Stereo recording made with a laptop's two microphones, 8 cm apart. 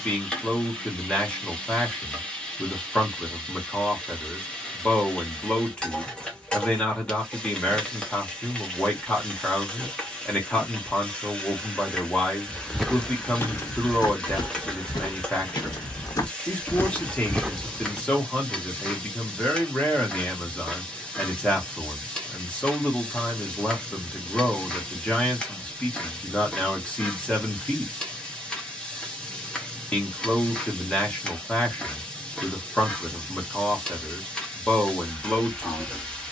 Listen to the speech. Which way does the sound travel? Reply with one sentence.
You can hear the speech stay put.